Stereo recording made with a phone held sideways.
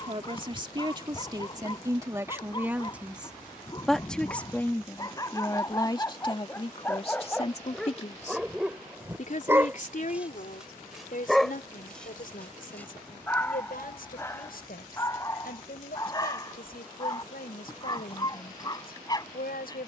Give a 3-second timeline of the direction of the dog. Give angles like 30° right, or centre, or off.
30° left, 30° left, 10° left, 10° right, 10° left, 20° left, 30° left.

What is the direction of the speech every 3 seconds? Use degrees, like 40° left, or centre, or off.
20° right, 10° left, 40° left, 60° left, 70° left, 80° left, 80° left.